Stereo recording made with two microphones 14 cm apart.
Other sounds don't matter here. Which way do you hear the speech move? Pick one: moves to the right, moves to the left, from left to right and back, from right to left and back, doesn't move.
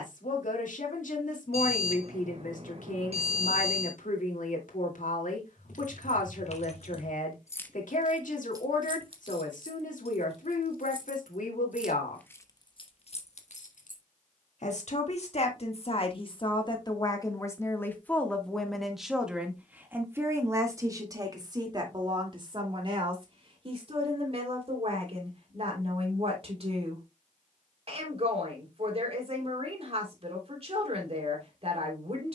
moves to the right.